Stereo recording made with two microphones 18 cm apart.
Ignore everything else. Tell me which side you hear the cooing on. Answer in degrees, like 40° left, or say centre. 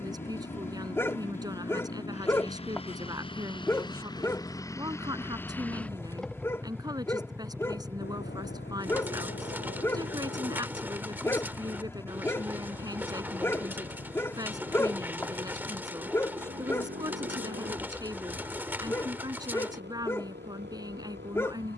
10° right.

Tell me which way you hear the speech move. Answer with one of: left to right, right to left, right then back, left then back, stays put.
stays put.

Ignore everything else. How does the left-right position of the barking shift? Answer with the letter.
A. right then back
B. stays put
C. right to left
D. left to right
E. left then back
B.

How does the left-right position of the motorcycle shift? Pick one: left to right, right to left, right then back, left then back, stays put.
left to right.